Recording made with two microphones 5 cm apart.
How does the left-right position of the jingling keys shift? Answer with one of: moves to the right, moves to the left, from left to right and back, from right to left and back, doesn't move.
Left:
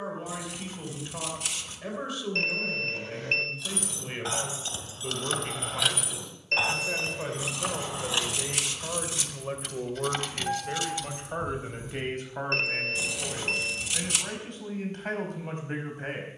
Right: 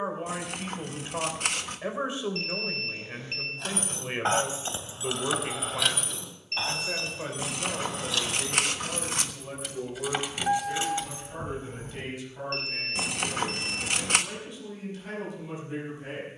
from right to left and back.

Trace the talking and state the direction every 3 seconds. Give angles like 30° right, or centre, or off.
30° right, 20° right, 10° left, 40° left, 60° left, 60° left.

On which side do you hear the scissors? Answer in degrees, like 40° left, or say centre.
50° right.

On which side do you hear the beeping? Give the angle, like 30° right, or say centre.
80° left.